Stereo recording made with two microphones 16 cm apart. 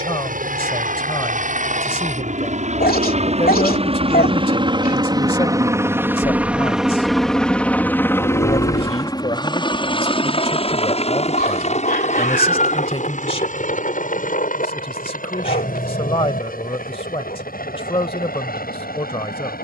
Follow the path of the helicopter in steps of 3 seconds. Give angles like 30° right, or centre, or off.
60° right, 30° right, 10° left, 40° left, 50° left, 60° left, 60° left.